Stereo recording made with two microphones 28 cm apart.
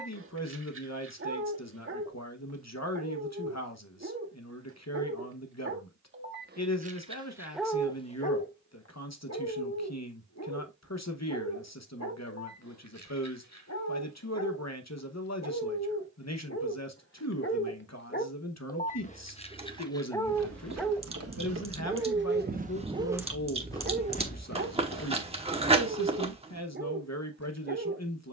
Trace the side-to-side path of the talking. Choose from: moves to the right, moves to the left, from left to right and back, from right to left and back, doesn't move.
doesn't move.